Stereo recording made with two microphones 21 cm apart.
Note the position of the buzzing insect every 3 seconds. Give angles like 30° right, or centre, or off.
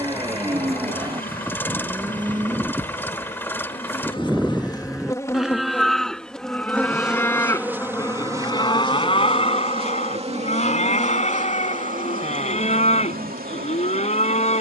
40° left, 20° left, 10° right, 30° right, 40° right.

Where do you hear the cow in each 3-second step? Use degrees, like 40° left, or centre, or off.
20° right, centre, 10° left, 30° left, 30° left.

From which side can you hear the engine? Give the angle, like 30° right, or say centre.
10° left.